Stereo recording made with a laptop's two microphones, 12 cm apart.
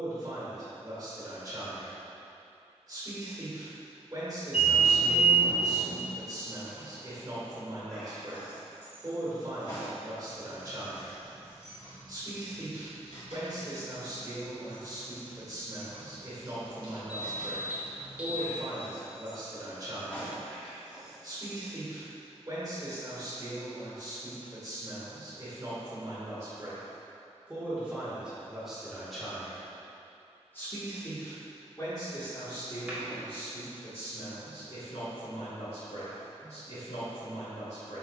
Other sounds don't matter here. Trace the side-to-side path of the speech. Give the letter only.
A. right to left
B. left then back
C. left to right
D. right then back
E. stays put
A.